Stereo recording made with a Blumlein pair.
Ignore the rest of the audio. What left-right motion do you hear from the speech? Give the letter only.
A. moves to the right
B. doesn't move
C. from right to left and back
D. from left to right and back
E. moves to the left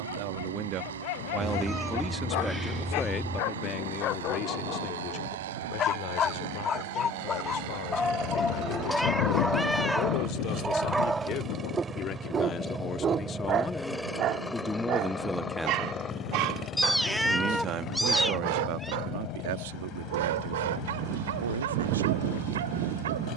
C.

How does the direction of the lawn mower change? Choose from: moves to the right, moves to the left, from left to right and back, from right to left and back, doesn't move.
moves to the left.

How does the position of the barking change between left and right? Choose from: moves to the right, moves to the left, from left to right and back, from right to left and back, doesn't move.
moves to the right.